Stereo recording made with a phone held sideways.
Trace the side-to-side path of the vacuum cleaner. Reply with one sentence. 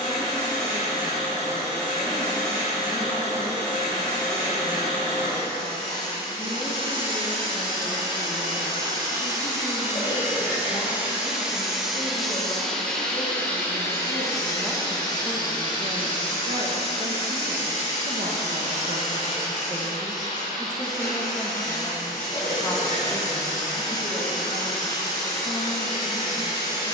You can hear the vacuum cleaner move from right to left.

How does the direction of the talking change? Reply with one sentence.
You can hear the talking move from left to right and back again.